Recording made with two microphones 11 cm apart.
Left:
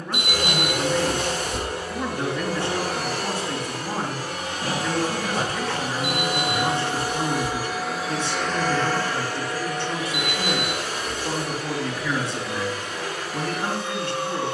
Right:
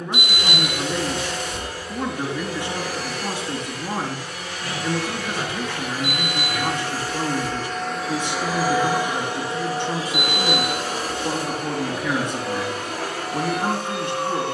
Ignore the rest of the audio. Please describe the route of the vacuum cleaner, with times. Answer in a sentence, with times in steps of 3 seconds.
In this clip you hear the vacuum cleaner on the left from 0 s, in the centre from 6 s and on the right from 9 s.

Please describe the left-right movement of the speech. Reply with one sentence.
You can hear the speech stay in one place.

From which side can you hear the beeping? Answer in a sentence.
You can hear the beeping on the left.